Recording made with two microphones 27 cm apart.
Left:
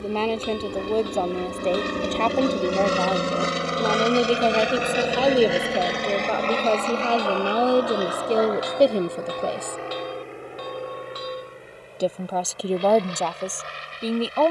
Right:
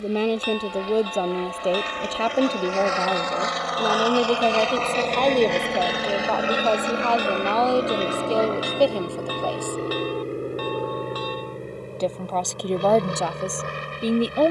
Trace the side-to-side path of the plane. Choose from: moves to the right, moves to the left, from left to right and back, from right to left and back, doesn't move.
moves to the right.